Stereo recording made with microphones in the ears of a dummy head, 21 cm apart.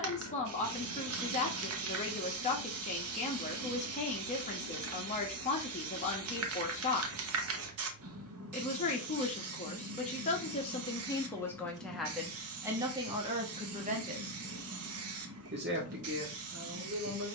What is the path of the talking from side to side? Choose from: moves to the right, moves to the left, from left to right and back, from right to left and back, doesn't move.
moves to the right.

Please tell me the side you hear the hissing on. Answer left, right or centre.
right.